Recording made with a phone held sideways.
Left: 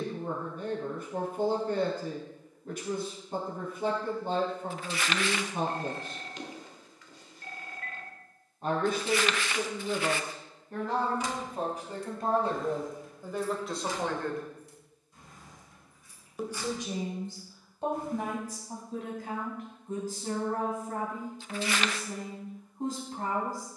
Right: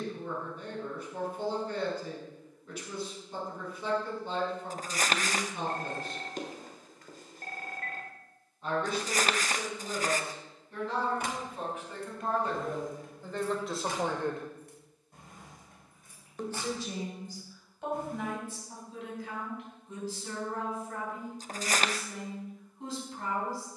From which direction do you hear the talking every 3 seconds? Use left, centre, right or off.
left, left, left, left, centre, left, left, left.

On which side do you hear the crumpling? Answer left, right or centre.
right.